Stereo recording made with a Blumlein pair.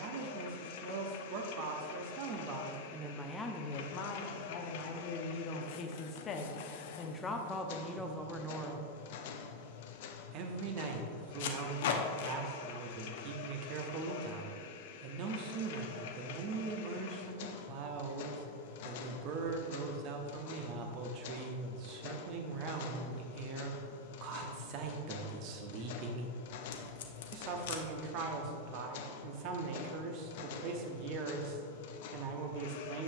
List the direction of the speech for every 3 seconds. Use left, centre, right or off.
right, left, centre, right, right, right, right, right, right, right, right.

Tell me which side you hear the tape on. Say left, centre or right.
left.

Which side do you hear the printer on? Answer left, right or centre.
left.